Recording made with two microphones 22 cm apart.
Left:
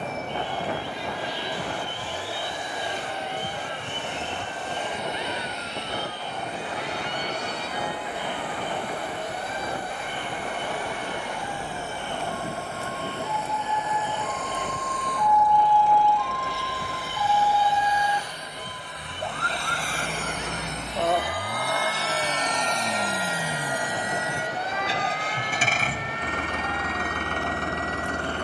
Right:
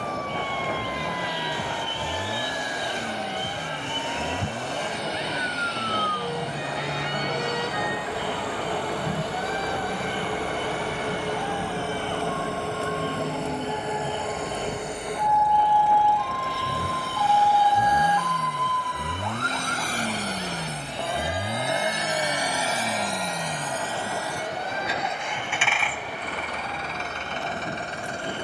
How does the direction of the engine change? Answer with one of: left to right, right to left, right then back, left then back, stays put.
right to left.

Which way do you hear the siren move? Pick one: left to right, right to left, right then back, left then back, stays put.
right to left.